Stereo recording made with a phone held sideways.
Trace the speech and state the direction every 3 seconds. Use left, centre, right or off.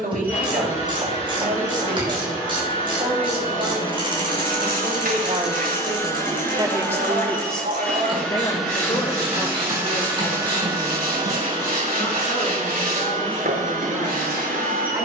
right, right, centre, left, left.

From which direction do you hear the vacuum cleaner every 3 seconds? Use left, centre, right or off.
left, left, centre, right, right.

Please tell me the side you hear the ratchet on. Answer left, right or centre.
right.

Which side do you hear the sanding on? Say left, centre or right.
right.